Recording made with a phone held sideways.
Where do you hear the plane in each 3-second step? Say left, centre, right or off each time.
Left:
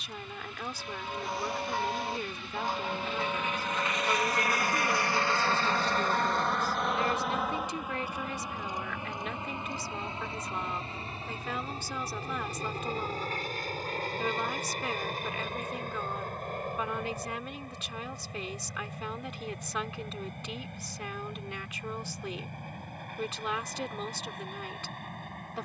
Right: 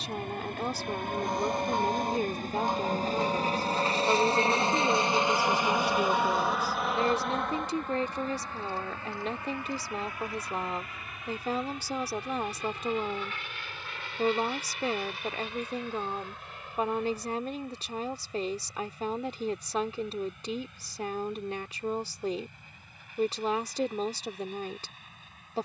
right, right, centre, left, left, left, left, left, left.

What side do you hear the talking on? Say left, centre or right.
right.